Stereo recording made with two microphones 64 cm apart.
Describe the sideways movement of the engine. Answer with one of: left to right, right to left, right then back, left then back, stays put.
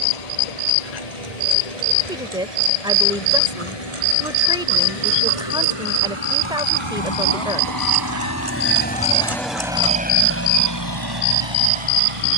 left to right.